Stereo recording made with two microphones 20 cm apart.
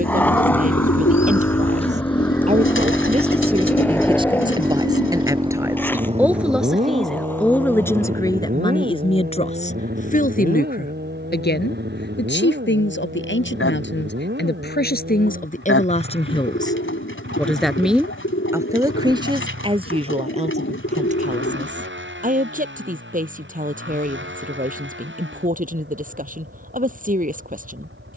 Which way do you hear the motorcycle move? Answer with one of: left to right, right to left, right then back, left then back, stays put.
left to right.